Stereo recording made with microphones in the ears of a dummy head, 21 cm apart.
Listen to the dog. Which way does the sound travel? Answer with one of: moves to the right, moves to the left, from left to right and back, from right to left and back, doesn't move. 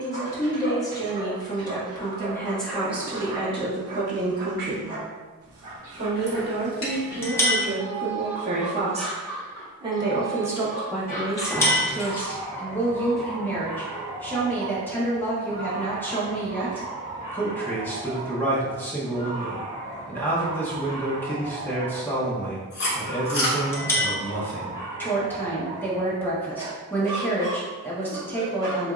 from right to left and back.